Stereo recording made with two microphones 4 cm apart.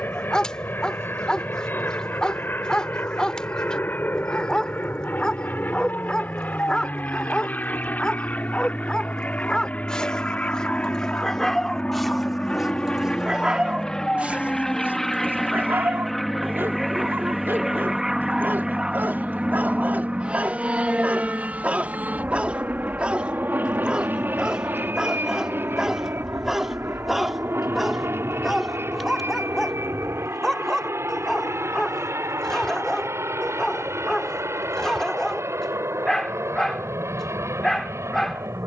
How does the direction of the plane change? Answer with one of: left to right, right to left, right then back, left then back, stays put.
left to right.